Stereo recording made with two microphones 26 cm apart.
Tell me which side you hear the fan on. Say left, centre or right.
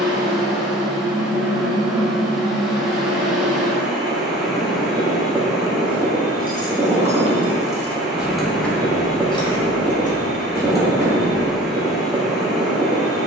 centre.